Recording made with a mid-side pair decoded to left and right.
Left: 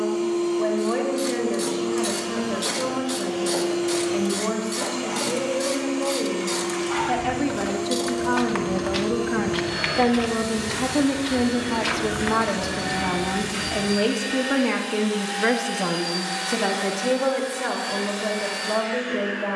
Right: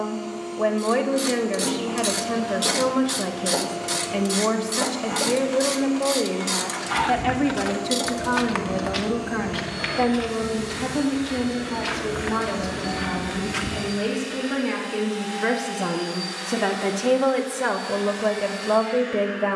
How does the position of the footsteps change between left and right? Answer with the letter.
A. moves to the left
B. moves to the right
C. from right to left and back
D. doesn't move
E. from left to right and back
C.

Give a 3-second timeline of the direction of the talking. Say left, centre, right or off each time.
right, right, centre, left, left, centre, right.